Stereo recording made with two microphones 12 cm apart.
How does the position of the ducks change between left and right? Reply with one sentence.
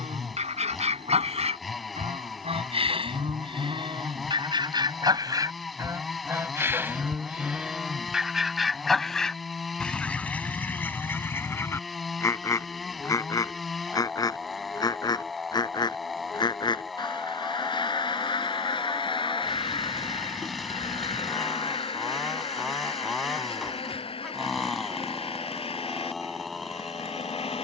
You can hear the ducks move to the left.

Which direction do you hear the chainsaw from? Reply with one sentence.
In this clip you hear the chainsaw in the centre.